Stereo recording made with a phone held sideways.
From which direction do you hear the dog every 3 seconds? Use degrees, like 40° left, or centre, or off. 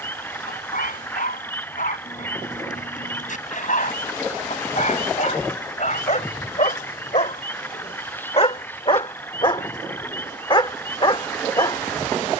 70° left, 60° left, 50° left, 40° left.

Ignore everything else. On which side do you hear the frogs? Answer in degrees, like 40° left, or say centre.
10° left.